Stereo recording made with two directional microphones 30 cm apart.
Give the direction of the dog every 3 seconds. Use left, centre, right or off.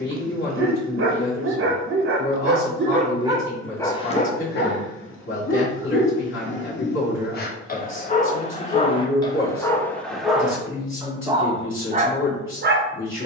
right, left, left, centre, right.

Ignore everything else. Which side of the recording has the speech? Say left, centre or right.
left.